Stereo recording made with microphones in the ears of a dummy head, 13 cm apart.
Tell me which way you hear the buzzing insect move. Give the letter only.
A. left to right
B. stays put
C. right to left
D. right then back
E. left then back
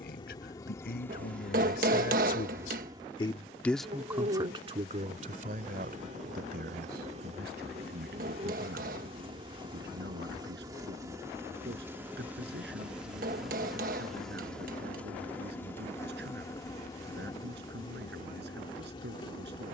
D.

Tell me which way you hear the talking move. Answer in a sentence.
You can hear the talking go from the left side to the right.